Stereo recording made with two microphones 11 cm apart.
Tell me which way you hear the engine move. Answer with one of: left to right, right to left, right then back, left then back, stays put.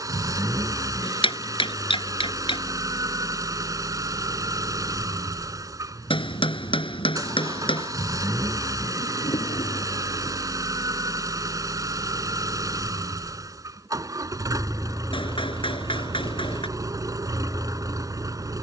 stays put.